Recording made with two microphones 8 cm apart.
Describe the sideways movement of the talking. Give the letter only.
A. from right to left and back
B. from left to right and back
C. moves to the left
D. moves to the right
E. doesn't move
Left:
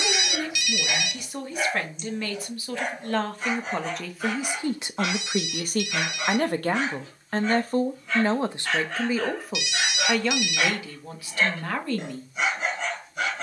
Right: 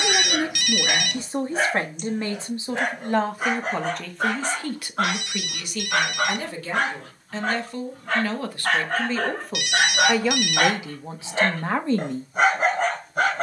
A.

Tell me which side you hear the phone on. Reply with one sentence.
You can hear the phone on the right.